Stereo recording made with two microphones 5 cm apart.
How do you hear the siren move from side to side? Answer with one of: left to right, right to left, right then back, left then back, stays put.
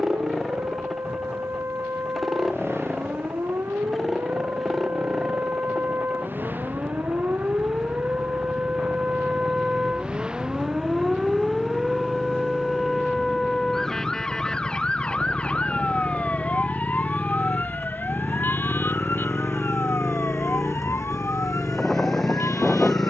right to left.